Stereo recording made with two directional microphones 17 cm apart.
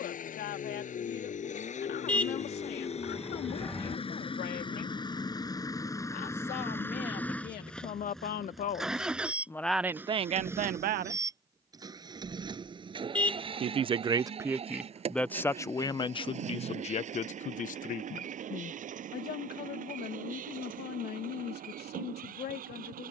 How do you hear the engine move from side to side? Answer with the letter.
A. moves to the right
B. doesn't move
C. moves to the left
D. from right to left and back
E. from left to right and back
A.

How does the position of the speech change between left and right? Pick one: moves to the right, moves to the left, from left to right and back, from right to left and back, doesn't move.
from left to right and back.